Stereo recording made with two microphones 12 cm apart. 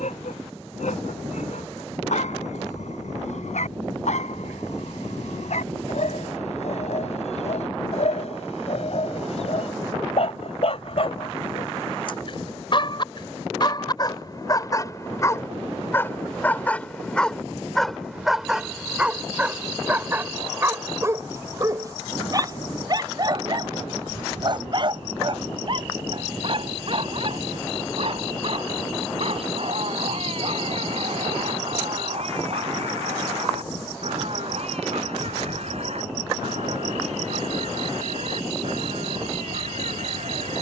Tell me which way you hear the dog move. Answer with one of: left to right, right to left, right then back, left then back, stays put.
left to right.